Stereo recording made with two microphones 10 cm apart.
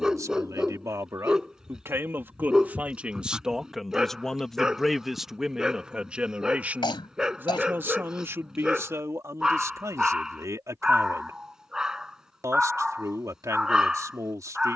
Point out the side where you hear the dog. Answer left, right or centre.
centre.